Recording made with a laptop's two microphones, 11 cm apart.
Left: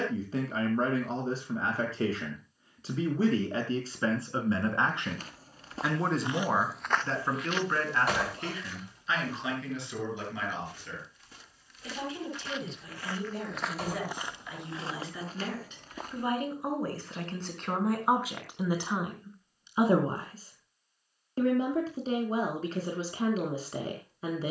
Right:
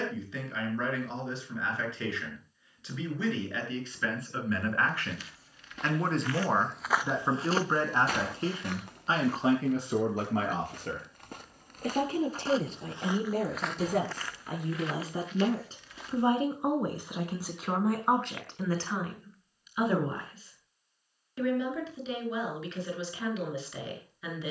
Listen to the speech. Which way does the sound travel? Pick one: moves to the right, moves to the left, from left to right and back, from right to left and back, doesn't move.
from left to right and back.